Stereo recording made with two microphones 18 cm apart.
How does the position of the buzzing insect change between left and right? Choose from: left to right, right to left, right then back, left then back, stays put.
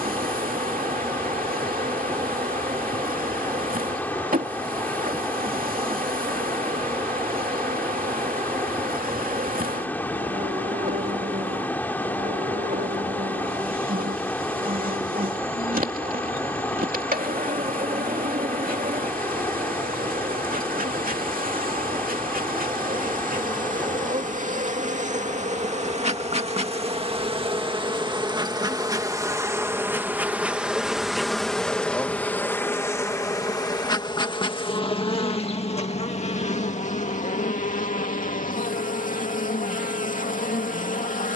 right to left.